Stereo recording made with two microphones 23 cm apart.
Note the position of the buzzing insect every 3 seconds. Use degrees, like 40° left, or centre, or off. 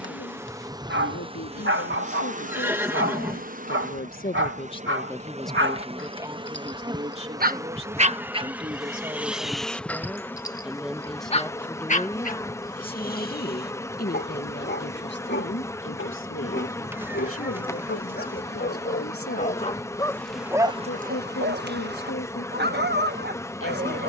20° right, 30° right, 10° right, 10° left, 10° left, 10° left, 10° left, 10° left.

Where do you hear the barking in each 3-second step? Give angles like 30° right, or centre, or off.
60° right, 60° right, 40° right, 10° left, 40° left, 50° left, 20° left, 50° right.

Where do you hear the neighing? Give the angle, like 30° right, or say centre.
10° right.